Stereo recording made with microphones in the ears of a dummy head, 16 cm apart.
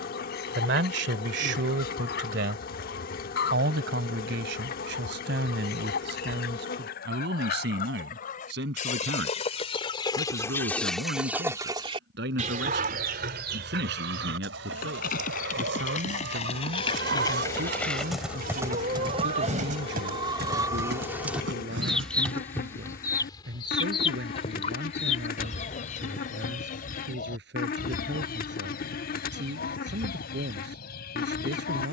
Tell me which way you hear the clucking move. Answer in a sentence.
In this clip you hear the clucking go right and come back.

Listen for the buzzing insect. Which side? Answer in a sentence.
You can hear the buzzing insect on the left.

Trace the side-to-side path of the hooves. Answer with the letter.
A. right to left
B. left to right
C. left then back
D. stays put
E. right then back
B.